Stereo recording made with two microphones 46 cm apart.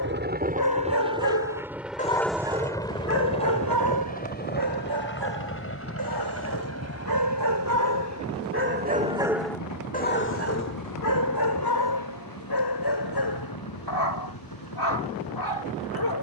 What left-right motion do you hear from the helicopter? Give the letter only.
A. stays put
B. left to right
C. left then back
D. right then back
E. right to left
E.